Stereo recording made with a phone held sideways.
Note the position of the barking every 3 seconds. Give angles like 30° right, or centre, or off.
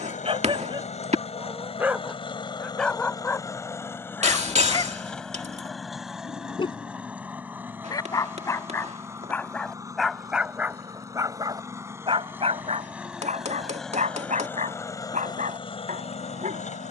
20° right, 20° left, 30° left, 10° right, 60° right, 60° right.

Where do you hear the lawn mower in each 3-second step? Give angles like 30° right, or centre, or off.
50° left, 10° left, 10° right, 20° right, centre, 40° left.